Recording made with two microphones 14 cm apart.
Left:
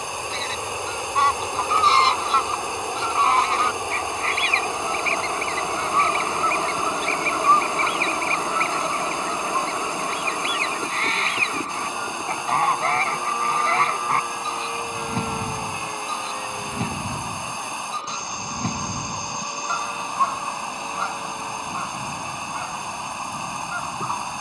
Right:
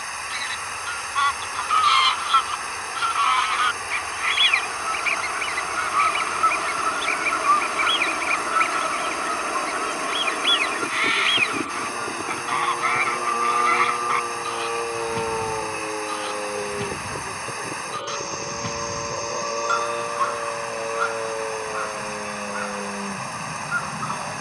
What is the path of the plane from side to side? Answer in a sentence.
You can hear the plane go from the left side to the right.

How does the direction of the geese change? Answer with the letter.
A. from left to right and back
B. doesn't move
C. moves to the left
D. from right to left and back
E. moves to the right
B.